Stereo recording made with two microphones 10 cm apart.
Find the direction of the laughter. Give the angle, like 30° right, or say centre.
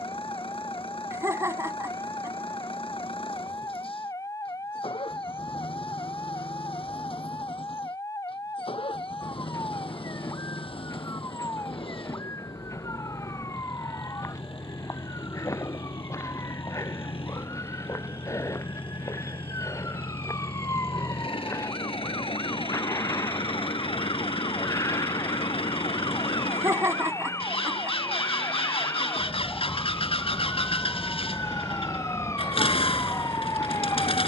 30° right.